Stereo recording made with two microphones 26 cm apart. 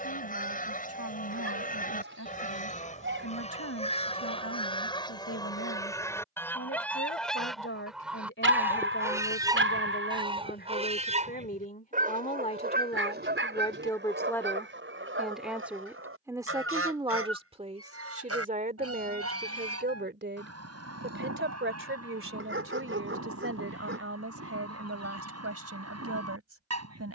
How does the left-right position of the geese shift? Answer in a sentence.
In this clip you hear the geese move from left to right.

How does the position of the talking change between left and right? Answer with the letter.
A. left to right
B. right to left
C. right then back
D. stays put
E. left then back
A.